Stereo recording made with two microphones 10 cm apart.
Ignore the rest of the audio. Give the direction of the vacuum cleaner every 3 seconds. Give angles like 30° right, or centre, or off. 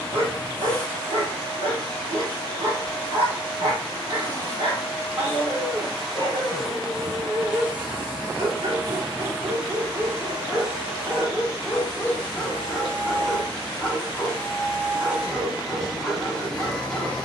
20° left, 10° left, 20° right, 40° right, 40° right, centre.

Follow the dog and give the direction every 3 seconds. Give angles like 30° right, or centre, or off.
70° right, 70° right, 60° right, 30° right, centre, 10° left.